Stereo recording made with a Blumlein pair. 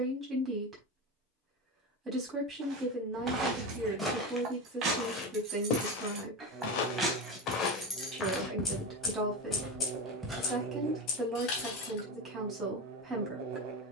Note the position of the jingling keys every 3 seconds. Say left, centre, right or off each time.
off, right, centre, left, off.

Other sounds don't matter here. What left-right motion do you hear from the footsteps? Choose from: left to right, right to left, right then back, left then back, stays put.
left then back.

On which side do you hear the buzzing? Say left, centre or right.
right.